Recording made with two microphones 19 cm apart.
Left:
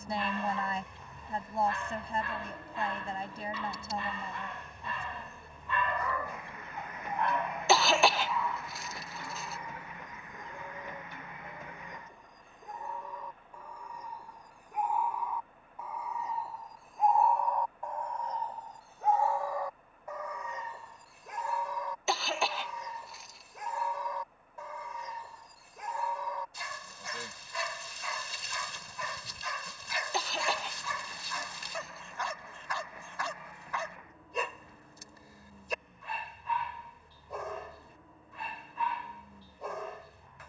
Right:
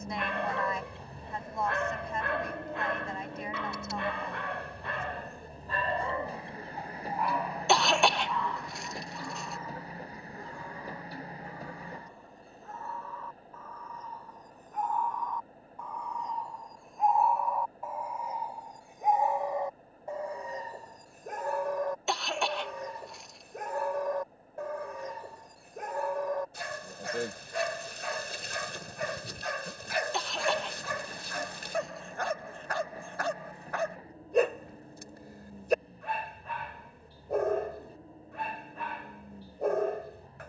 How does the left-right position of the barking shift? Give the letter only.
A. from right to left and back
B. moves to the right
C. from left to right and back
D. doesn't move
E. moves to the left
A.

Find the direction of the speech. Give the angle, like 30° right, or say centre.
30° left.